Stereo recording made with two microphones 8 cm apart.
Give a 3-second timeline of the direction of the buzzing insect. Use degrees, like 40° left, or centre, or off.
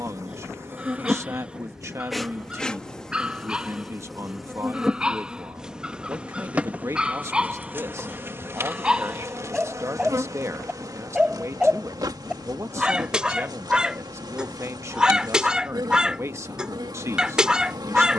20° right, centre, 20° right, 50° right, 60° right, 60° right.